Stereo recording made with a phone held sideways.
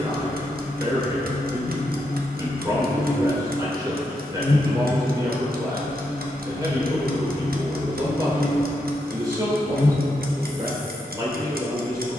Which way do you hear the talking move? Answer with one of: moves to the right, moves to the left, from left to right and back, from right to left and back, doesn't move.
doesn't move.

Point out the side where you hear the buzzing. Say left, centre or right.
left.